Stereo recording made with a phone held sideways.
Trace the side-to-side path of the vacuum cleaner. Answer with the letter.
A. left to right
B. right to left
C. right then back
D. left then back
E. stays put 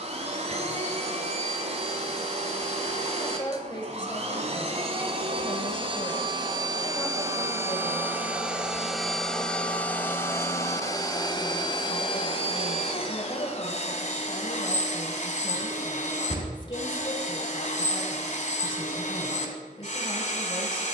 B.